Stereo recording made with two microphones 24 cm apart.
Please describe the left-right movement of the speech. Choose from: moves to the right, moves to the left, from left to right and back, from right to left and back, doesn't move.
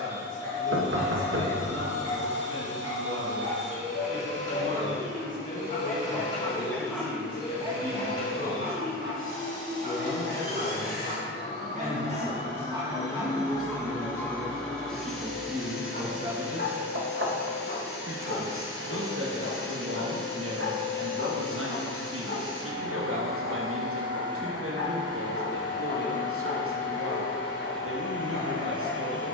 moves to the right.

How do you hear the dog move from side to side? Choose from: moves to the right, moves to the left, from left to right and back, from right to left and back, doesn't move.
from left to right and back.